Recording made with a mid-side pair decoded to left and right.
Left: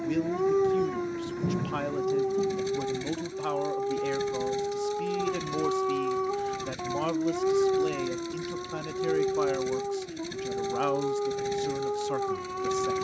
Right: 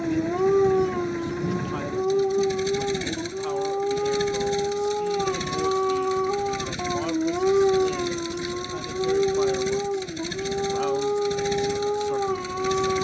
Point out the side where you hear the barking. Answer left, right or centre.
right.